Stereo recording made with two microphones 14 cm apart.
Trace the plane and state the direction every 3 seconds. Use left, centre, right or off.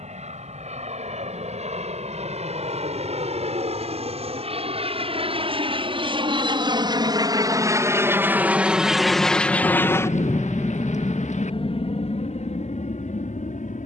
right, right, right, left, left.